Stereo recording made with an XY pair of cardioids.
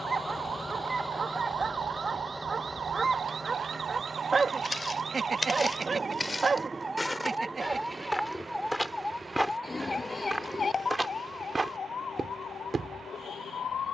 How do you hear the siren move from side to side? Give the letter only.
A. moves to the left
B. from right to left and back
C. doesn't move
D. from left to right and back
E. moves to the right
A.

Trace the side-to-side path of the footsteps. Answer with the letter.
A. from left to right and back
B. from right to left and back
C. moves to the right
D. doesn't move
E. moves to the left
C.